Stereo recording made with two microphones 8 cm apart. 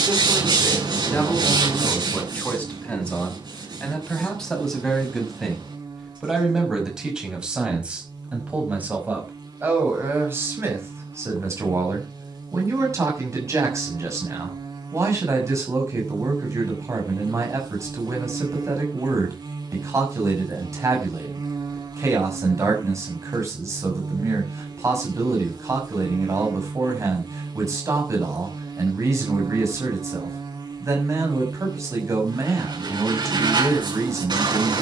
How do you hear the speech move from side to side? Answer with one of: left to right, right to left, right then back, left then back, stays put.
left to right.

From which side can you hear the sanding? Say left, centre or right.
right.